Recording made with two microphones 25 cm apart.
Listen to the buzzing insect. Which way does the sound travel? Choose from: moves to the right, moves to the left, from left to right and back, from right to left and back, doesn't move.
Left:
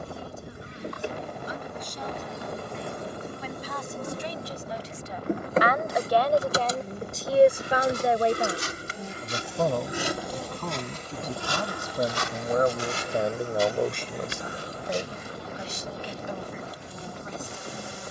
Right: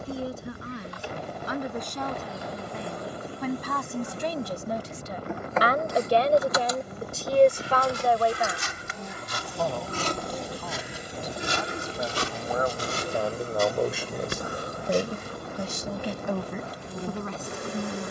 moves to the right.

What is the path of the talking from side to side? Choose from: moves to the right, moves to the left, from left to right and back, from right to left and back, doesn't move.
from right to left and back.